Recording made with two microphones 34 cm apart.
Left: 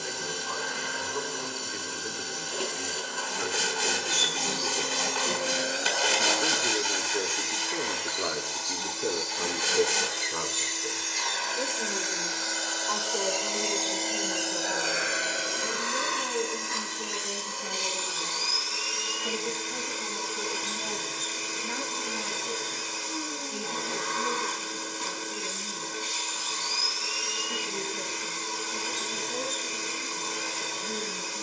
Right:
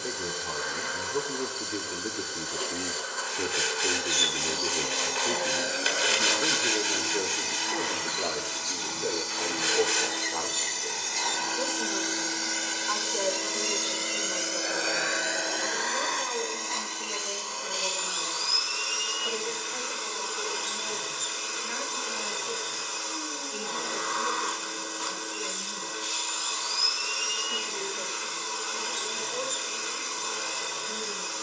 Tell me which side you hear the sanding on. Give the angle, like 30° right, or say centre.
60° left.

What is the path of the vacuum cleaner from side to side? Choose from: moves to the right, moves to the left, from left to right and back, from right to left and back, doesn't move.
from left to right and back.